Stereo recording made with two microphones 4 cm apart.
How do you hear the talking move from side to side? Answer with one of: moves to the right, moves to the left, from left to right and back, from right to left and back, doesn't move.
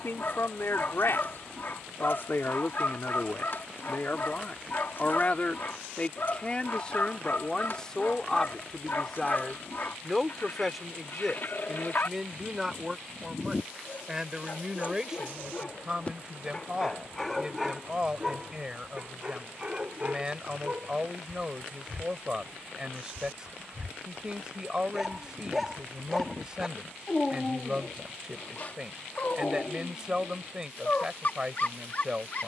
moves to the right.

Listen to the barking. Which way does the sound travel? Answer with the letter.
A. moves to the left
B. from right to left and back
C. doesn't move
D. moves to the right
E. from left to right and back
E.